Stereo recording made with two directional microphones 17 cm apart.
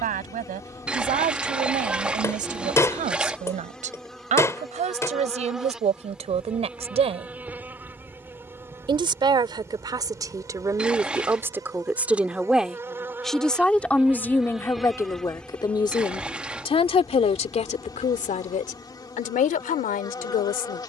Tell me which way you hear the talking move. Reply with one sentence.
You can hear the talking go from the right side to the left.